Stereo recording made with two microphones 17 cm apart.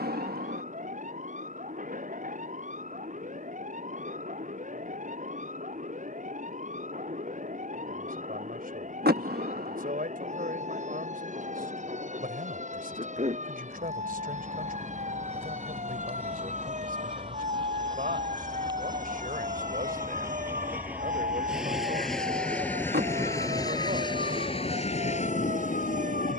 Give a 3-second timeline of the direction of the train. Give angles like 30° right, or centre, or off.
50° right, 50° right, 50° right, 50° right, 40° right, 30° right, 20° right, 10° left, 40° left.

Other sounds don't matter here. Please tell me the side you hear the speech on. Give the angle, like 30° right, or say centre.
60° right.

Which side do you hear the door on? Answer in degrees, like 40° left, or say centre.
70° right.